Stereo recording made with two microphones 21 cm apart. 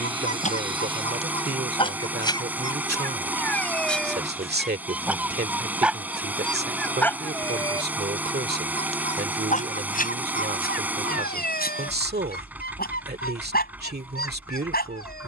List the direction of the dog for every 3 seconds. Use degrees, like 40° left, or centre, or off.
30° left, centre, 10° left, 40° left, 50° left.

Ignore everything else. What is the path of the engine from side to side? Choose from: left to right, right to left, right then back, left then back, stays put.
stays put.